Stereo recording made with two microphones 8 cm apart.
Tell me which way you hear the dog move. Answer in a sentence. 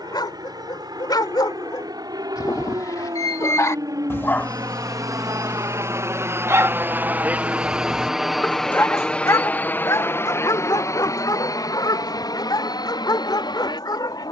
You can hear the dog go right and come back.